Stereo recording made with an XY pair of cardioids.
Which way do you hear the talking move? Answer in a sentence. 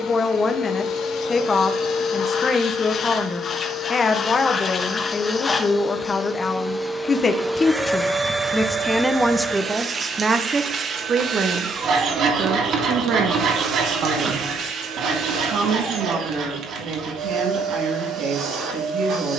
In this clip you hear the talking move from left to right.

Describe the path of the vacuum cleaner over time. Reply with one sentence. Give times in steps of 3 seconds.
In this clip you hear the vacuum cleaner on the left from 0 s, in the centre from 6 s and on the right from 9 s.